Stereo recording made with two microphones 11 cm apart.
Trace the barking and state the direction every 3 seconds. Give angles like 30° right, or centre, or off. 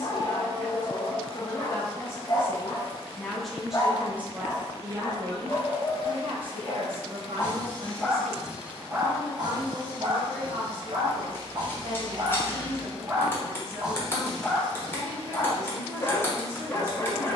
40° left, 40° left, 10° left, 50° right, 20° right, 30° left.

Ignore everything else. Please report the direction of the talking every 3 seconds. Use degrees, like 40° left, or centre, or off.
30° left, 20° right, 60° right, 80° right, 80° right, 80° right.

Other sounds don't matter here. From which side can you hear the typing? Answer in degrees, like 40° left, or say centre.
20° left.